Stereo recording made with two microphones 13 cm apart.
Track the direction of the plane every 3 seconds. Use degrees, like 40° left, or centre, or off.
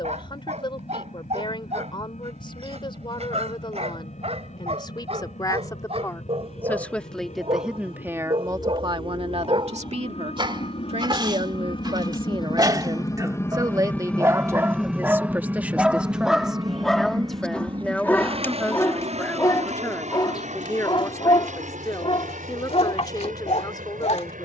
80° left, 70° left, 70° left, 50° left, 20° left, 30° right, 50° right, 60° right.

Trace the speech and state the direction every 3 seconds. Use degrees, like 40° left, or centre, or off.
40° left, 30° left, 10° right, 50° right, 30° right, 10° right, 10° left, 30° left.